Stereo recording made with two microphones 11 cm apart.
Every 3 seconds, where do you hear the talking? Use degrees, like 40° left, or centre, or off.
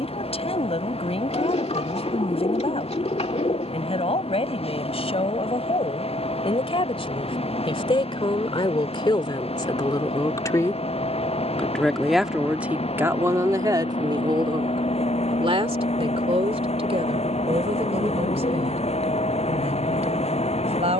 70° left, 60° left, 50° left, 30° left, 30° right, 70° right, 80° right.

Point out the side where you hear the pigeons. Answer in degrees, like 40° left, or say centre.
70° left.